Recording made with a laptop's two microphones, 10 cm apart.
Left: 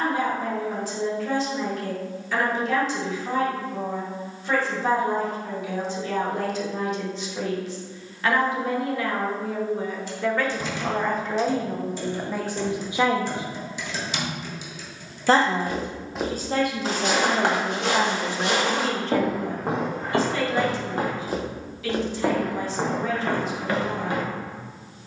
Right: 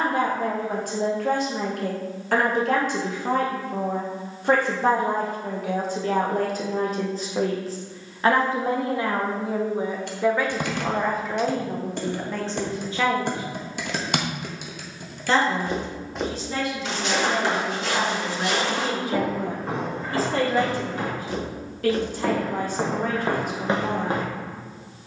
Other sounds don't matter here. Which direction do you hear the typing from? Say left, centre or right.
right.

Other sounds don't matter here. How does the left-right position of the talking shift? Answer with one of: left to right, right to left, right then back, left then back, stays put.
left then back.